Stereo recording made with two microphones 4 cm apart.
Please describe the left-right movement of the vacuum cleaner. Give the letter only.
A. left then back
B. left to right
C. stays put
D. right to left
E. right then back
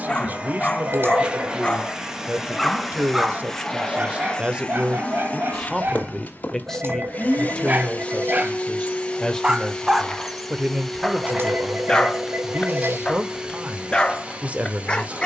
A.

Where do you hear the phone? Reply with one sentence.
You can hear the phone on the right.